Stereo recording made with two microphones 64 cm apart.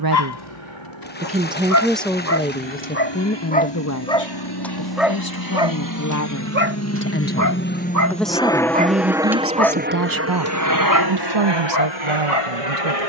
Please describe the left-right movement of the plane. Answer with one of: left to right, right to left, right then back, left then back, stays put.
left to right.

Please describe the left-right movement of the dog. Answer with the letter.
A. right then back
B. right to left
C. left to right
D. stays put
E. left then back
A.